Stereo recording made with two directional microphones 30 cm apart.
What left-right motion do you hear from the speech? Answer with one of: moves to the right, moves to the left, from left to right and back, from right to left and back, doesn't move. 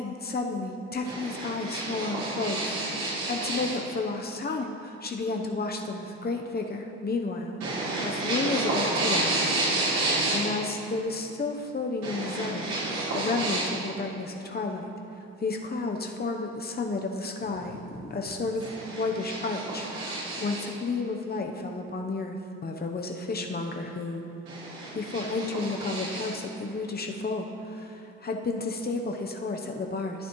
doesn't move.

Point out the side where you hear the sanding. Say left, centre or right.
right.